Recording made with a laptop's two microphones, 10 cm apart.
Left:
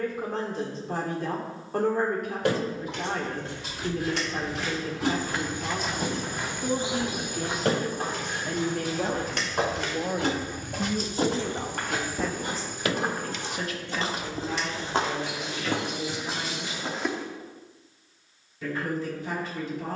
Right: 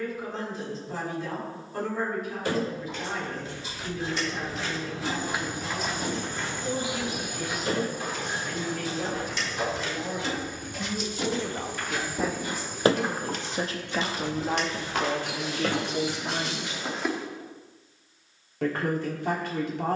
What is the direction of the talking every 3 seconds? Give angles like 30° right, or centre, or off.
60° left, 60° left, 50° left, 20° left, 30° right, 60° right, 70° right.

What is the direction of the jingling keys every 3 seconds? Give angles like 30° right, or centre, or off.
80° left, 80° left, 80° left, 50° left, 40° right, 70° right, off.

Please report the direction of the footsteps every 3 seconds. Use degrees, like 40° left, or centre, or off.
off, 10° right, 40° left, 60° left, 50° left, 10° left, off.